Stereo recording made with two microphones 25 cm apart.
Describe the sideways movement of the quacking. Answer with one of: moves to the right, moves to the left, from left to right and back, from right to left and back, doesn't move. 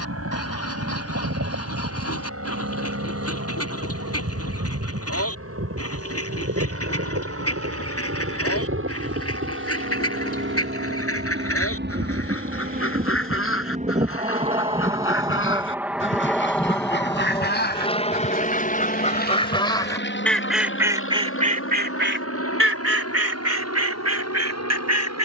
moves to the right.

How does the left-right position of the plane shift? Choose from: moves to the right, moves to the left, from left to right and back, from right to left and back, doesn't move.
moves to the left.